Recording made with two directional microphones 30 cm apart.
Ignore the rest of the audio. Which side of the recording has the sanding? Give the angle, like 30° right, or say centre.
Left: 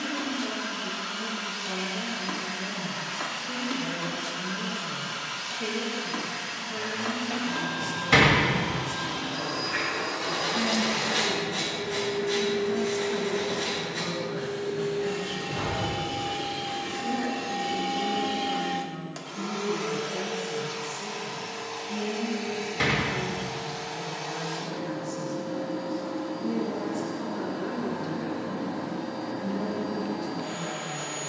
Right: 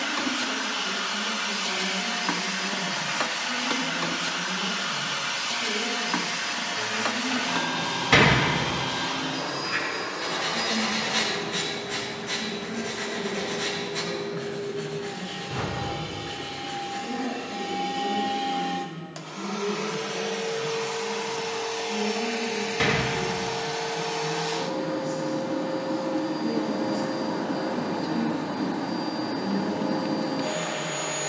30° right.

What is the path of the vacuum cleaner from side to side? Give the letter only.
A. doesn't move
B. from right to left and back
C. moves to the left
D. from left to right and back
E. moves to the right
B.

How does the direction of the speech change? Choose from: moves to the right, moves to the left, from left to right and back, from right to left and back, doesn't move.
moves to the right.